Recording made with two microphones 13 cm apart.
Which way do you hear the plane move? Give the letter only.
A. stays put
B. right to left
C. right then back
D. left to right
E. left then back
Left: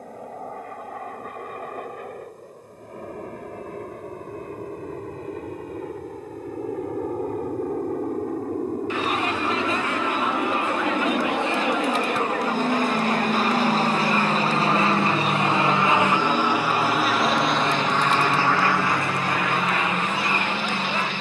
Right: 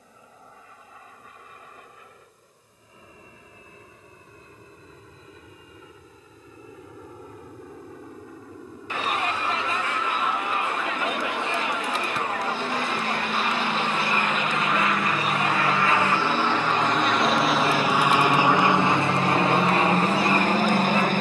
D.